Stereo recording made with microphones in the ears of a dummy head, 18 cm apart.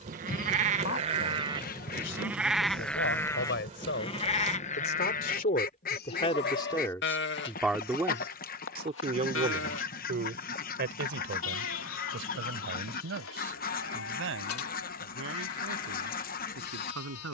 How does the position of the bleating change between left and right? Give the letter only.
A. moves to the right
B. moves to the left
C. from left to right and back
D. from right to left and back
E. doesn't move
B.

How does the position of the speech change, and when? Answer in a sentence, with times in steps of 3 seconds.
In this clip you hear the speech on the left from 0 s, in the centre from 6 s and on the right from 9 s.